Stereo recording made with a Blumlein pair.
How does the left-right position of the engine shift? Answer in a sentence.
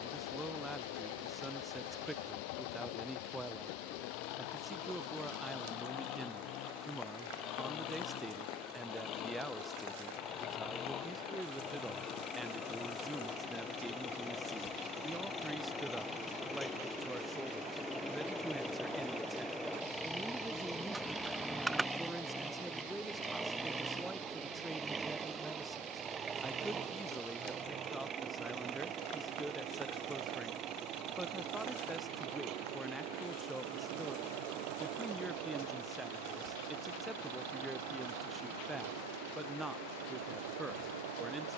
In this clip you hear the engine go from the left side to the right.